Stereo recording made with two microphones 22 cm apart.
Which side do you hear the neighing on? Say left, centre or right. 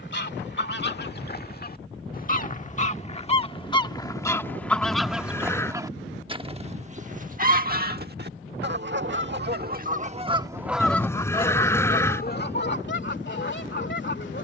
centre.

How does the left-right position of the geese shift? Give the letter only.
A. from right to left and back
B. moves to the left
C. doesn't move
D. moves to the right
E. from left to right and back
E.